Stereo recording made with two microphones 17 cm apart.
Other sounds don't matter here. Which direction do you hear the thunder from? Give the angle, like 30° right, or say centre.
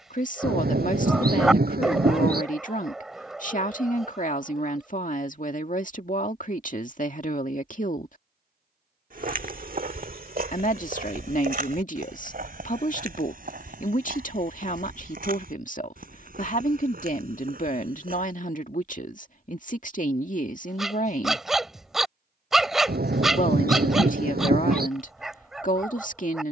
60° right.